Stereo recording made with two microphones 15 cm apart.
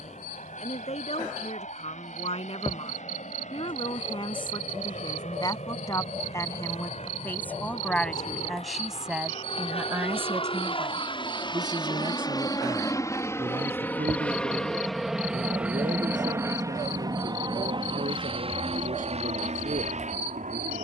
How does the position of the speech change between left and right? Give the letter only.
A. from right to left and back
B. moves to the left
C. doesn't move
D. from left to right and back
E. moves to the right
E.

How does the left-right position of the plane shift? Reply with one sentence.
You can hear the plane move from left to right.